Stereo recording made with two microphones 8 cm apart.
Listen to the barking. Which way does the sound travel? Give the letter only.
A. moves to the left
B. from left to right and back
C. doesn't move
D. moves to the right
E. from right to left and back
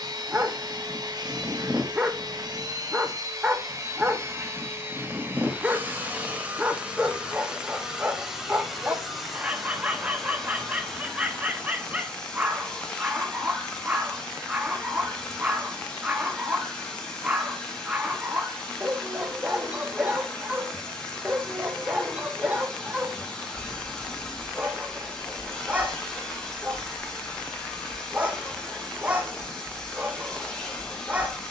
C.